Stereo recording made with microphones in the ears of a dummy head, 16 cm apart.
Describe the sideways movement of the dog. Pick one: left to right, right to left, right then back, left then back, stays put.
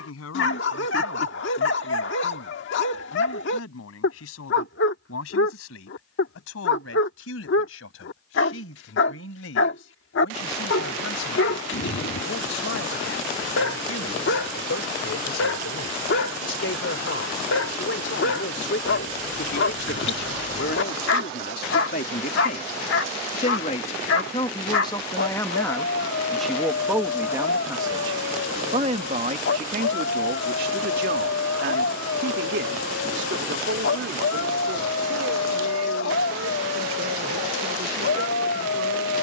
stays put.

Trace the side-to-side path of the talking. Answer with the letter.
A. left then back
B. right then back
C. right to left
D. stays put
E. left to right
E.